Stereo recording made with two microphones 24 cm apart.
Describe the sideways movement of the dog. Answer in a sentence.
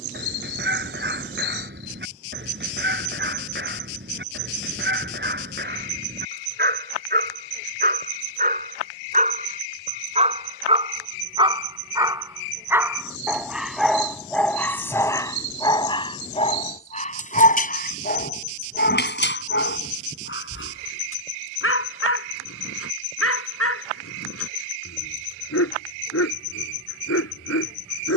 In this clip you hear the dog move from right to left.